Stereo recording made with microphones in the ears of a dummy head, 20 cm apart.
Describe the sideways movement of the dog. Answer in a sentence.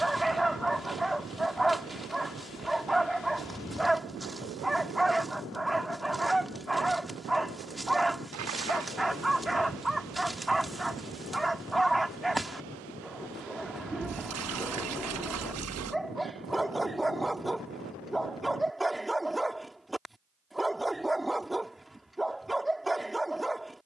In this clip you hear the dog stay put.